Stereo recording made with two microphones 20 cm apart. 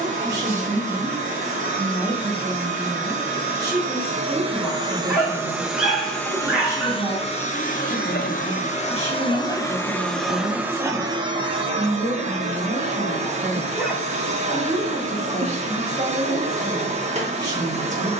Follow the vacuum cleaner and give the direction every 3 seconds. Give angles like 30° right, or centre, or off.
40° right, 20° right, 30° left, centre, 30° right, 30° right.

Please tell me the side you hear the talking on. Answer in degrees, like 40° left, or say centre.
20° right.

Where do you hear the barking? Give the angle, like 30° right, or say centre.
centre.